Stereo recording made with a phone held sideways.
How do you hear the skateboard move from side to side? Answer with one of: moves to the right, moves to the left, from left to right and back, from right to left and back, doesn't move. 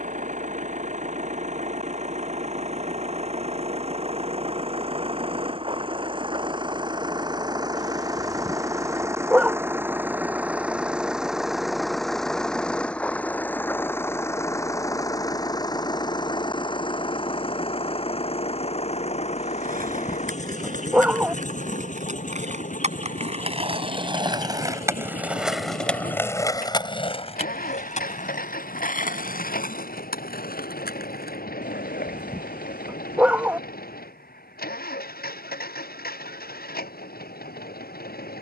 moves to the left.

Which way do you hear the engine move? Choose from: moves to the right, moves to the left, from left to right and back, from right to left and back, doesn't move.
moves to the left.